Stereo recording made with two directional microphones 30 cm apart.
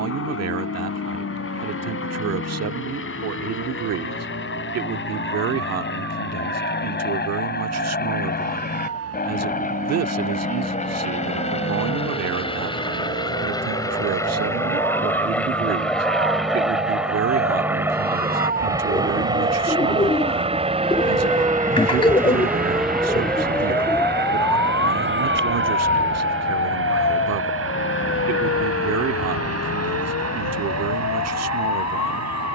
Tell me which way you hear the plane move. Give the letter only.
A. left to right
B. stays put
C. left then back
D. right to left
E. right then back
A.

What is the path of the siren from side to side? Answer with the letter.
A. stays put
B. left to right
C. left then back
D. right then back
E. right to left
E.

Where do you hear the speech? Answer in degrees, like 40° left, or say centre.
60° right.